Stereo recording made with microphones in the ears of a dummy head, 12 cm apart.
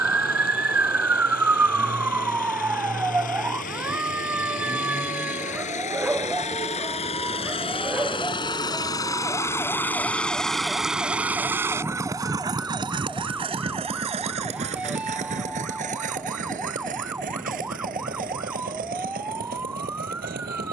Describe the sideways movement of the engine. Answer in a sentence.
You can hear the engine move to the right.